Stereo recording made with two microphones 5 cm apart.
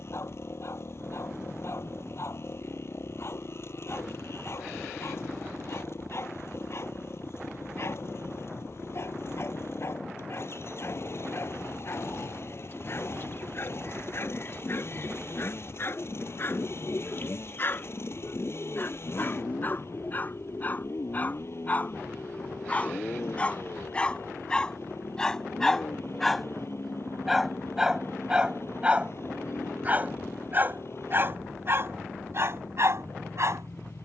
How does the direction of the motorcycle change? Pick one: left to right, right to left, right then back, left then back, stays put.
stays put.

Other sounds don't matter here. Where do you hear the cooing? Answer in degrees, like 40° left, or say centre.
40° left.